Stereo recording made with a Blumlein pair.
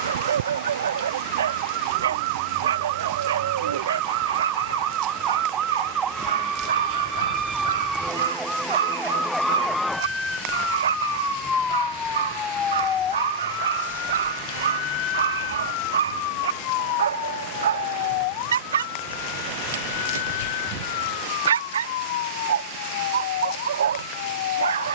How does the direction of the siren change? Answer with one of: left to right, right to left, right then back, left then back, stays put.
right to left.